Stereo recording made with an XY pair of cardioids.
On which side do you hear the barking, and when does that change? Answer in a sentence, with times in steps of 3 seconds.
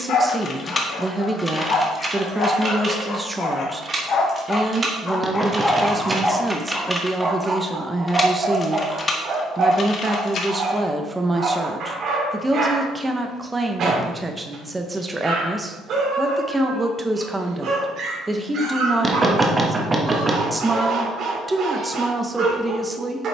You can hear the barking on the left from 0 s and on the right from 6 s.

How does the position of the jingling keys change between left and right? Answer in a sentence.
You can hear the jingling keys go right and come back.